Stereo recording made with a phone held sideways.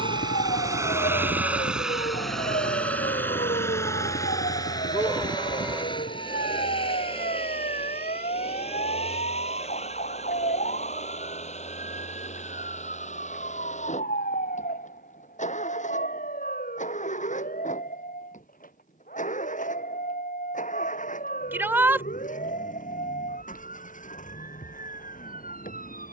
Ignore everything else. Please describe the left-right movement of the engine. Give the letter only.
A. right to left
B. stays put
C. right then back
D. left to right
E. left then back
A.